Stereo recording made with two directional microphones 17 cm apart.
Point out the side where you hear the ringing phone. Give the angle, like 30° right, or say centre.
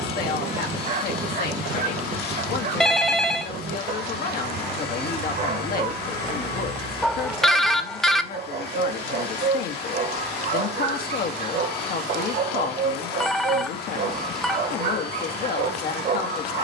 centre.